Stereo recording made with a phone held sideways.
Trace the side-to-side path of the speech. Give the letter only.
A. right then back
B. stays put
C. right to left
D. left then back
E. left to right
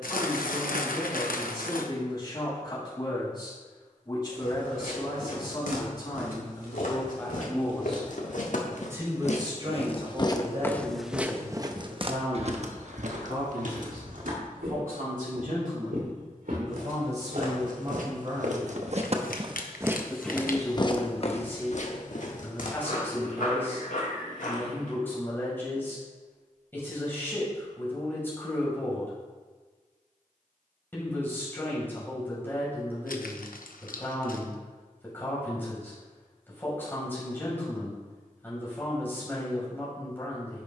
A.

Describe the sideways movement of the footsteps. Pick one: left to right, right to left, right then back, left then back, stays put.
right then back.